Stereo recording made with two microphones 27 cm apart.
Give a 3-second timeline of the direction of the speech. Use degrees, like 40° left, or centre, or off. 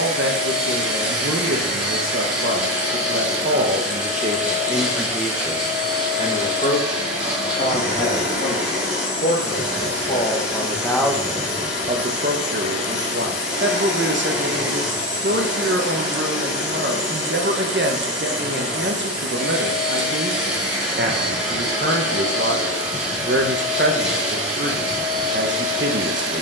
50° right, 20° right, 40° left, 10° left, 40° right, 40° right, 40° right, 40° right, 40° right.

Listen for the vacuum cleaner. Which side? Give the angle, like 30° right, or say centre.
centre.